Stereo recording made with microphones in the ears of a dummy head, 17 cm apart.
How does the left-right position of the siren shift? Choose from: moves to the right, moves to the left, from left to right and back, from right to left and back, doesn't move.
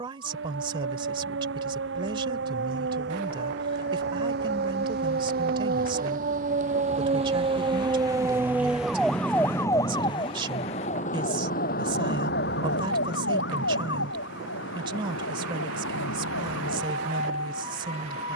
moves to the left.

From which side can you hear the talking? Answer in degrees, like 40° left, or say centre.
30° right.